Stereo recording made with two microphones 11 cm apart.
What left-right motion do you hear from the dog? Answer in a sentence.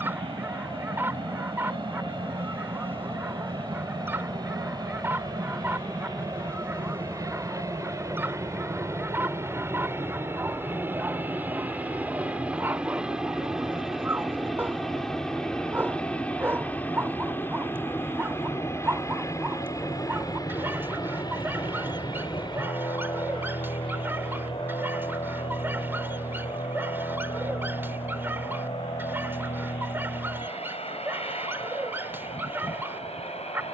You can hear the dog stay put.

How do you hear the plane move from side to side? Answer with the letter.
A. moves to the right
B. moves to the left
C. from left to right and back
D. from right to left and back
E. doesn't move
B.